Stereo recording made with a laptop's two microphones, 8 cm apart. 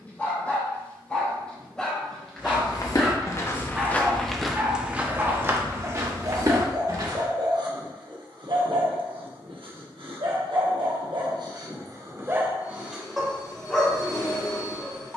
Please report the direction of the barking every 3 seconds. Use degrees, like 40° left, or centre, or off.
10° left, 20° right, 50° right, 70° right, centre.